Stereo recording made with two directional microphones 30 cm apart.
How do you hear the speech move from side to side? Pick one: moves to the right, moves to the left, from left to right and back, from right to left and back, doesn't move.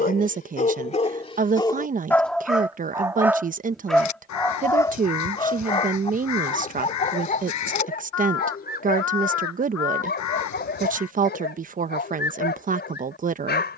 doesn't move.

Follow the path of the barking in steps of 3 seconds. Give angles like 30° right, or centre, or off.
10° left, 10° left, 30° left, 30° left, 30° left.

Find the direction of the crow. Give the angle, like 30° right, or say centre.
70° left.